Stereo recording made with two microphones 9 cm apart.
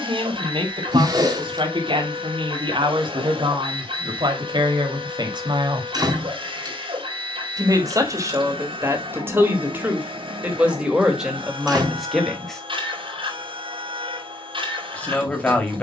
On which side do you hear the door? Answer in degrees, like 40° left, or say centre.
50° right.